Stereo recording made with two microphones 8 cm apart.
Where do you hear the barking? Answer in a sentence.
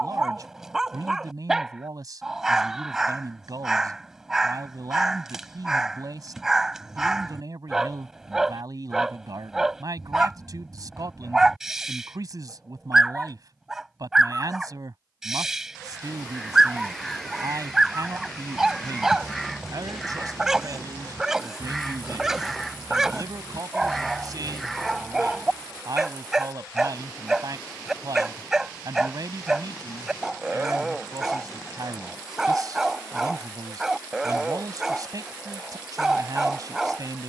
In this clip you hear the barking in the centre.